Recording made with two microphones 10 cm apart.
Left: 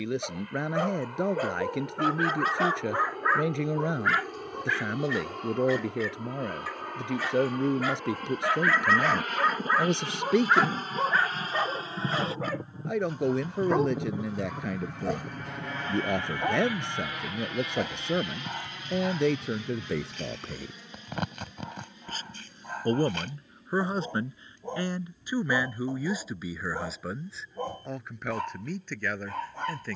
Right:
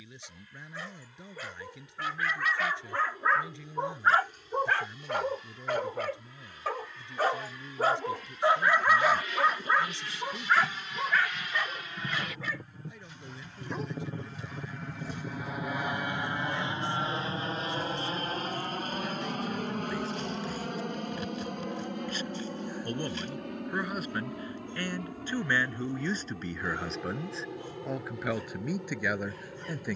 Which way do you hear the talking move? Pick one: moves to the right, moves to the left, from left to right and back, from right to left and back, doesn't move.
moves to the right.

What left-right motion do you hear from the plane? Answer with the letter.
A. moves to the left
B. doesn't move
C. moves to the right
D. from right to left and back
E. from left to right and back
C.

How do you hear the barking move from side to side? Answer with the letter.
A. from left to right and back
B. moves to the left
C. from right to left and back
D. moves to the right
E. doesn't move
A.